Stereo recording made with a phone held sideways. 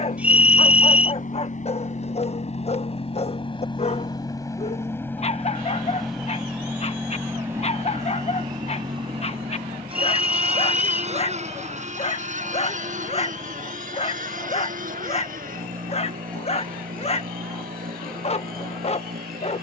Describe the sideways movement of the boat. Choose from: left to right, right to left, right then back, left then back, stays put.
left to right.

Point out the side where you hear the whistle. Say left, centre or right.
centre.